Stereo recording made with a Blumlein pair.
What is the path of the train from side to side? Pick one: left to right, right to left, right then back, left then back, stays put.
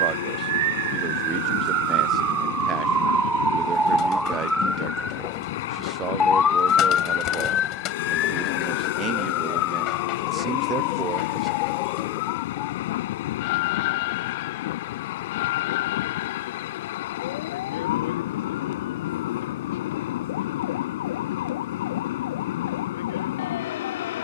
stays put.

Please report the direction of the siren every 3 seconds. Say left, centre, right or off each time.
right, centre, left, left, left, left, left, left.